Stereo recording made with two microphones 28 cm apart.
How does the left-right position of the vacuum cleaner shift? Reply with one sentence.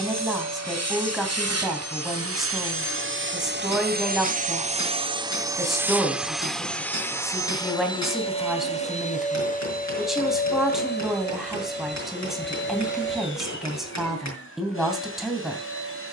In this clip you hear the vacuum cleaner move to the left.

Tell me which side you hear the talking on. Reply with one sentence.
In this clip you hear the talking in the centre.